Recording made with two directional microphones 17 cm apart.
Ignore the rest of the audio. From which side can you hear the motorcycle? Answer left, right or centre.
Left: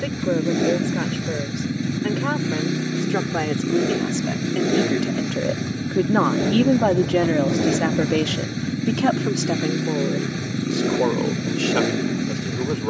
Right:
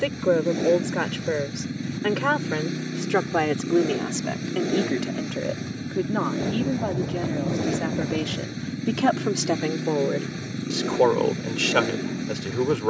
left.